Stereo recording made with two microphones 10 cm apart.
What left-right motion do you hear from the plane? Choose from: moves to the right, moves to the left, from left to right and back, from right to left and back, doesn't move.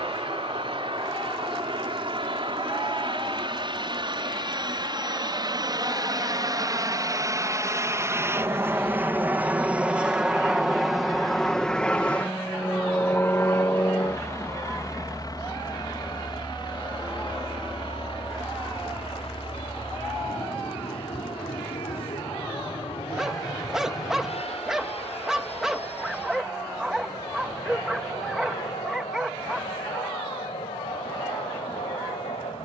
moves to the left.